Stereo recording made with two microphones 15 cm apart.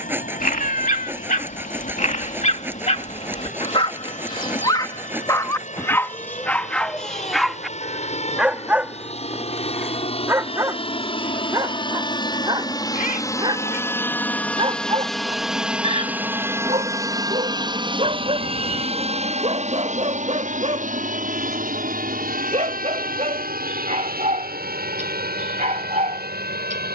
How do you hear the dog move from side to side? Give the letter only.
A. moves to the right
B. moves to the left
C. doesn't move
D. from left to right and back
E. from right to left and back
A.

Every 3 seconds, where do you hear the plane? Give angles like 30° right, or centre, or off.
60° left, 60° left, 50° left, 40° left, 20° left, 10° right, 40° right, 60° right, 70° right.